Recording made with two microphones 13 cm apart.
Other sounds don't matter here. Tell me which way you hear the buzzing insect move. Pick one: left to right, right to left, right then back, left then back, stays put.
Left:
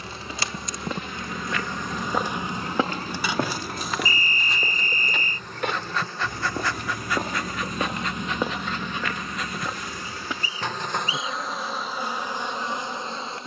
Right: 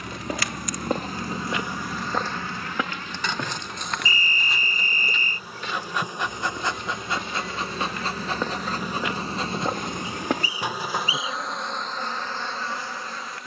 right then back.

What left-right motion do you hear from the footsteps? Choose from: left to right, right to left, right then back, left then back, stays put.
left then back.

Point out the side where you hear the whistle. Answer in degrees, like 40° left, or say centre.
40° left.